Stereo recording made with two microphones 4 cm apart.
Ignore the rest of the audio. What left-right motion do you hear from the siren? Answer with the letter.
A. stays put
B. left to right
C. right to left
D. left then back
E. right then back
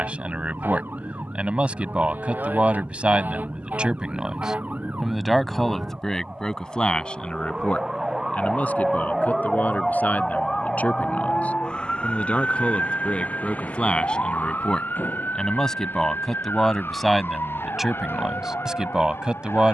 C.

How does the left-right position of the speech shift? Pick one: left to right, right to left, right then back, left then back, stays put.
left then back.